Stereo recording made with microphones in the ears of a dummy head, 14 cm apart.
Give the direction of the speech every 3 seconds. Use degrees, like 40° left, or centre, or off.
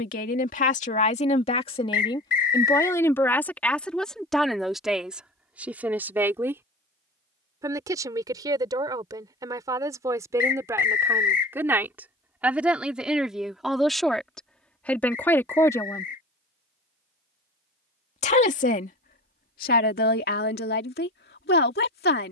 40° left, centre, 20° right, 20° right, centre, 20° left, 60° left, 70° left.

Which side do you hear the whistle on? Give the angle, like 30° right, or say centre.
60° left.